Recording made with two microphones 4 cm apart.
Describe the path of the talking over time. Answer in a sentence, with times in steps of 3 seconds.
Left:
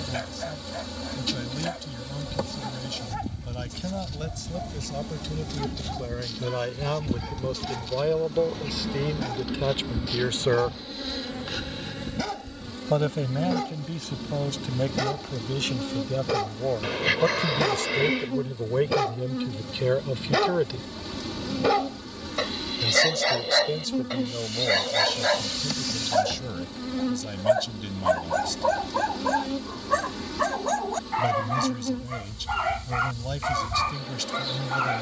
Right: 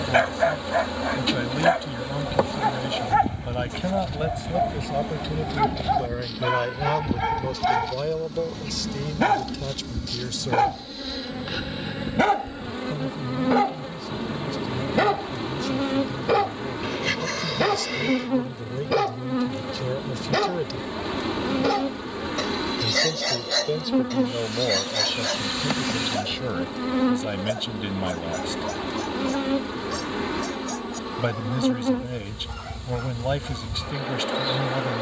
You can hear the talking on the right from 0 s, in the centre from 6 s, on the left from 9 s, in the centre from 21 s and on the right from 24 s.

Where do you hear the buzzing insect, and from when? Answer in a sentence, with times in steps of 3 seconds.
In this clip you hear the buzzing insect on the right from 0 s, in the centre from 6 s and on the right from 12 s.